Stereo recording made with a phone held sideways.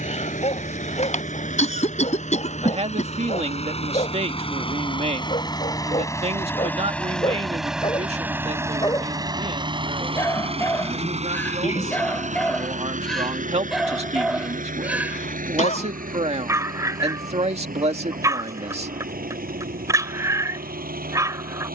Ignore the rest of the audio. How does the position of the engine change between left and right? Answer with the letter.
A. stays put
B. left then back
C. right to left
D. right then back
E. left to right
E.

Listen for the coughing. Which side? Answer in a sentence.
In this clip you hear the coughing on the left.